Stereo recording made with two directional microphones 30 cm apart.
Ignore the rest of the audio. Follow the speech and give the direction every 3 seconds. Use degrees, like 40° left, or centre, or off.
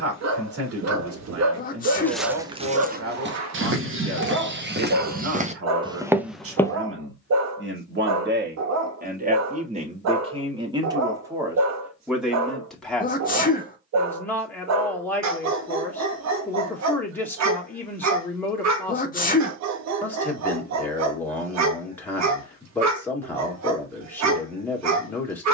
50° right, 50° right, 40° right, 20° right, centre, 10° left, 10° left, 10° left, 10° left.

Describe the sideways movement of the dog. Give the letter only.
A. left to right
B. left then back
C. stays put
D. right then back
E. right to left
C.